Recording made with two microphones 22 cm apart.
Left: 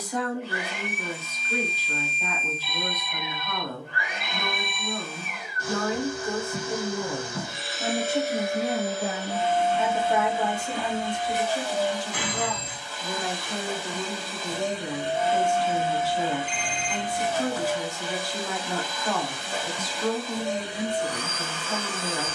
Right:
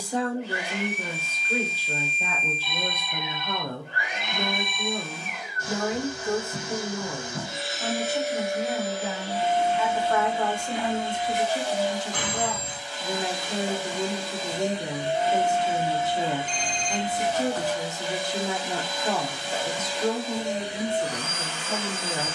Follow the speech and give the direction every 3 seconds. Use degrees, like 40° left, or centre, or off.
30° right, 30° right, 10° left, 10° left, 20° right, 20° right, 20° right, 20° right.